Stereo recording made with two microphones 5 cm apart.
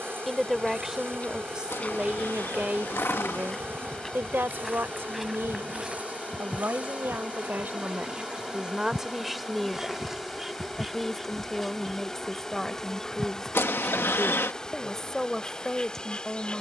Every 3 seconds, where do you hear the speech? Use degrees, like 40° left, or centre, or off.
20° right, 50° right, 40° right, 10° left, 10° left, 10° left.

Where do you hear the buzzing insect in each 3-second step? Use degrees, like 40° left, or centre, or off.
50° right, 40° right, 30° right, 10° right, 10° left, 20° left.